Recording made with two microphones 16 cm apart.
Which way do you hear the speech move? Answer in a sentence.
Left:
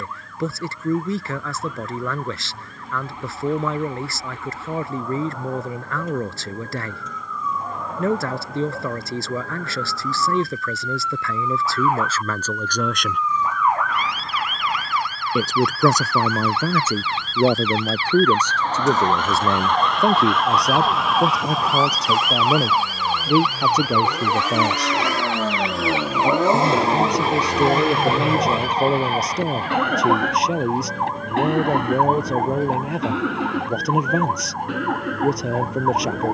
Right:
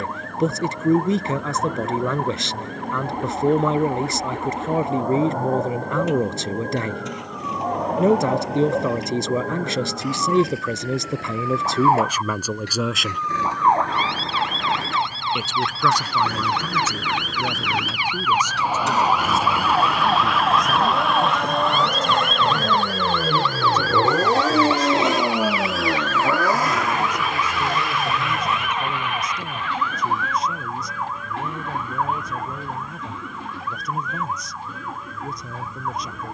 You can hear the speech go from the right side to the left.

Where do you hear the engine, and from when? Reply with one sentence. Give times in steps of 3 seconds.
You can hear the engine on the right from 0 s, in the centre from 24 s and on the left from 27 s.